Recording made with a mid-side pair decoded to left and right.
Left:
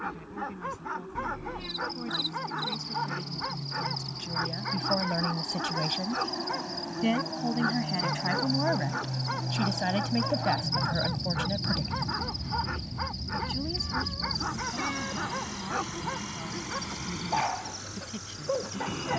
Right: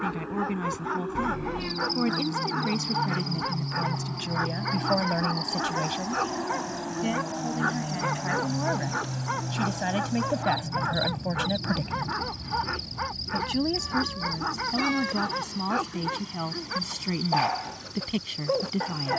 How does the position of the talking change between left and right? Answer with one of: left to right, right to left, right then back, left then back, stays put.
left then back.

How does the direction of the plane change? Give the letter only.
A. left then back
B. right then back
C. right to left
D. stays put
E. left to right
C.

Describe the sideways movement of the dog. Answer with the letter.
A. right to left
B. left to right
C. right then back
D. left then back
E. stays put
E.